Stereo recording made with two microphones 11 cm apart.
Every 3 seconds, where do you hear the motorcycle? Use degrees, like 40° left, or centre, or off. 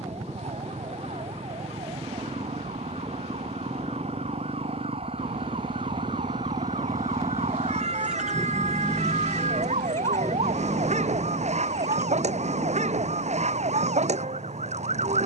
70° right, 60° right, 20° right, 30° left, 50° left.